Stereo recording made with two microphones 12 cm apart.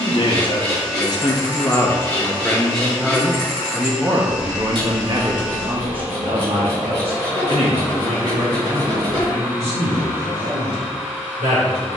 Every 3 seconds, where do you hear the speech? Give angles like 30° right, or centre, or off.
30° left, 30° right, 60° right, 70° right.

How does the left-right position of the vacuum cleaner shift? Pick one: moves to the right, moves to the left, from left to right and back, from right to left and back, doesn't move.
doesn't move.